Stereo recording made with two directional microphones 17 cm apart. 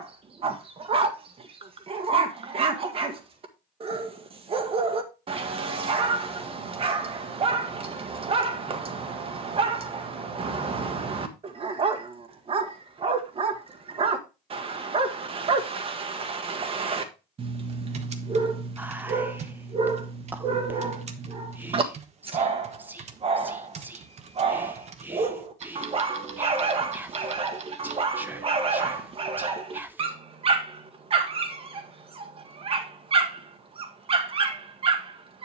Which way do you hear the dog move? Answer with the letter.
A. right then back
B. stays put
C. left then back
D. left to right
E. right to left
B.